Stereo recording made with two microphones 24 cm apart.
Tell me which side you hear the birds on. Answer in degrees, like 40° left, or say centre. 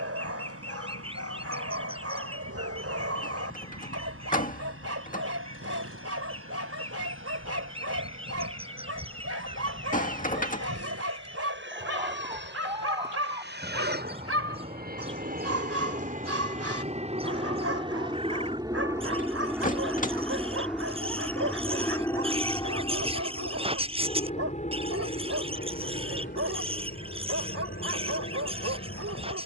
20° right.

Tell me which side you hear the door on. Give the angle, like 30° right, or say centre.
30° left.